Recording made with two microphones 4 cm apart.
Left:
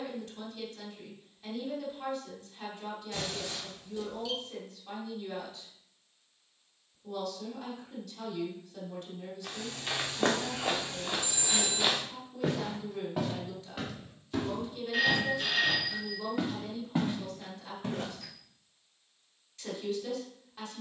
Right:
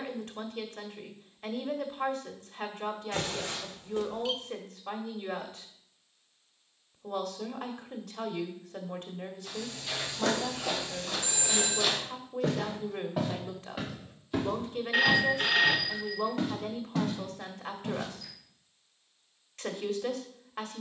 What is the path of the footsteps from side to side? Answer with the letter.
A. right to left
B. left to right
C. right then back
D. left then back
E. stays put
C.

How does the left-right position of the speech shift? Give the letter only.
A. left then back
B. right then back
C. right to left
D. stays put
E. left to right
D.